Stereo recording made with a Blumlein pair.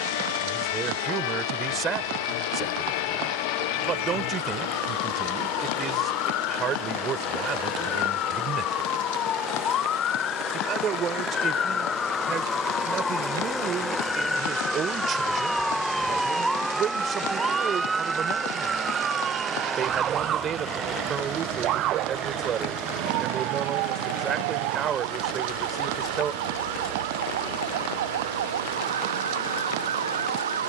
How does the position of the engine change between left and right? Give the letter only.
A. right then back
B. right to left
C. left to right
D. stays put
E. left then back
C.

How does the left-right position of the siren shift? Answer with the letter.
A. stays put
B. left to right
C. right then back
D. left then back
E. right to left
B.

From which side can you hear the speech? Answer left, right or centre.
right.